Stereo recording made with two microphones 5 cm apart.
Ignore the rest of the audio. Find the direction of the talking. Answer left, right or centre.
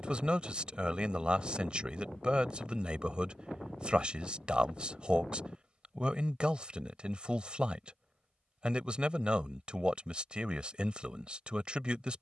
right.